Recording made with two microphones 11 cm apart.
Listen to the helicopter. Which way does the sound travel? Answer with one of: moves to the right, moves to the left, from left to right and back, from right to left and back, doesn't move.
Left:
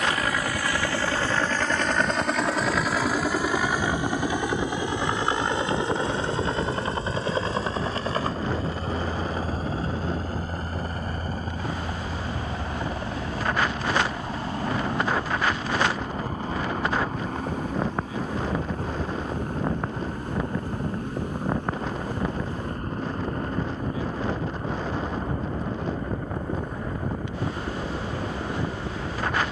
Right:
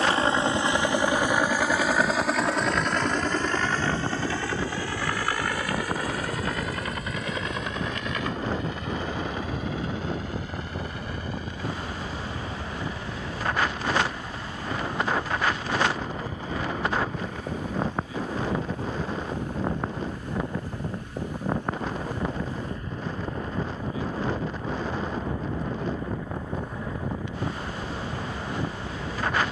moves to the left.